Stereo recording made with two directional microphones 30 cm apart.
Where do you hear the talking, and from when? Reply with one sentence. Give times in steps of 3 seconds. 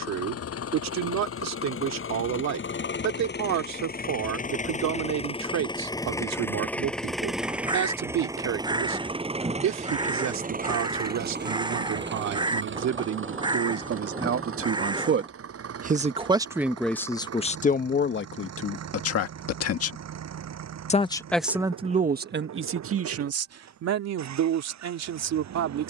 You can hear the talking on the right from 0 s, in the centre from 15 s, on the left from 18 s and on the right from 21 s.